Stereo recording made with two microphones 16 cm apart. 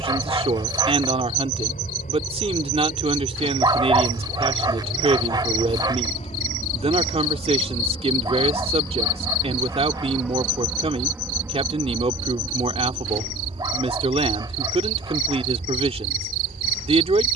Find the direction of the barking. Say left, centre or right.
right.